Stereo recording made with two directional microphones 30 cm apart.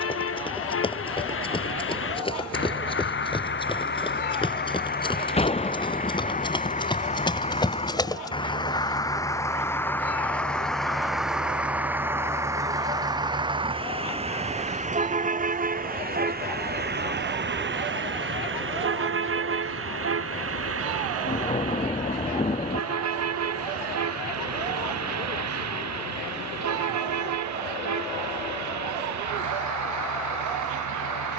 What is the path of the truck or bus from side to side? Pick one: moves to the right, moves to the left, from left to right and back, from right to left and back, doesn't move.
moves to the right.